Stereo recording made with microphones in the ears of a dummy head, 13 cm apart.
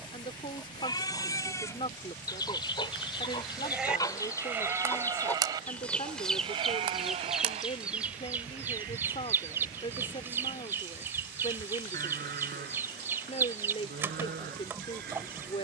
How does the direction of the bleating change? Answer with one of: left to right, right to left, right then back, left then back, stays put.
left to right.